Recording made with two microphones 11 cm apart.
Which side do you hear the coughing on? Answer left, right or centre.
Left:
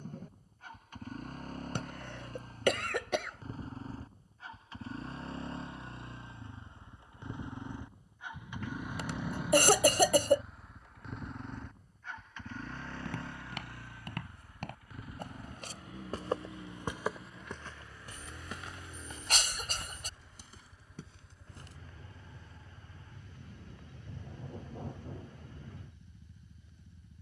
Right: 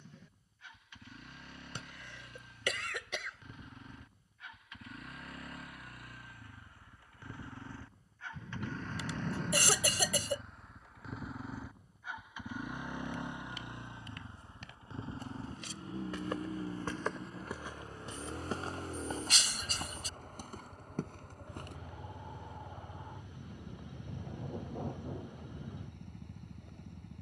left.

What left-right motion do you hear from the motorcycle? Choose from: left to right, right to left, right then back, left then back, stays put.
left to right.